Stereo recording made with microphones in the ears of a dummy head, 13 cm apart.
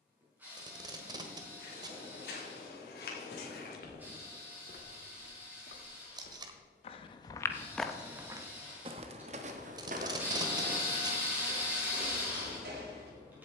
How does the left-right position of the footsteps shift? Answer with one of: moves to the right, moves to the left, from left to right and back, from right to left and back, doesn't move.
moves to the right.